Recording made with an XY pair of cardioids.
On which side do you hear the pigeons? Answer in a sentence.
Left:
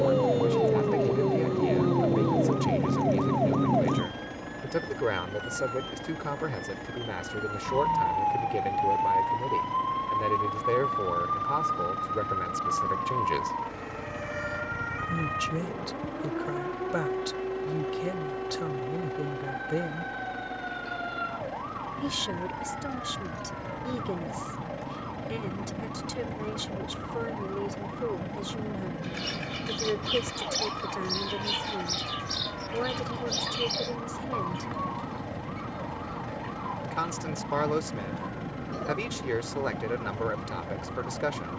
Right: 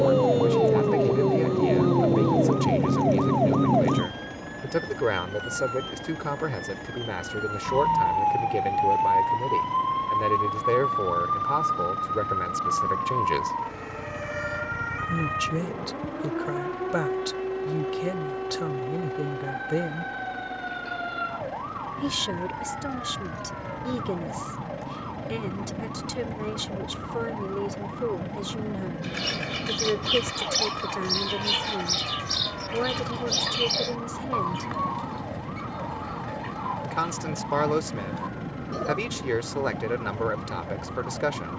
In this clip you hear the pigeons on the right.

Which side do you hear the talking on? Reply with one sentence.
In this clip you hear the talking on the right.